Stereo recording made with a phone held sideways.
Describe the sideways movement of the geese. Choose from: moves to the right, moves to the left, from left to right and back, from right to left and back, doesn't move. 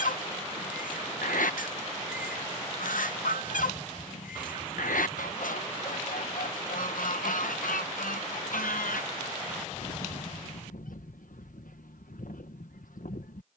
doesn't move.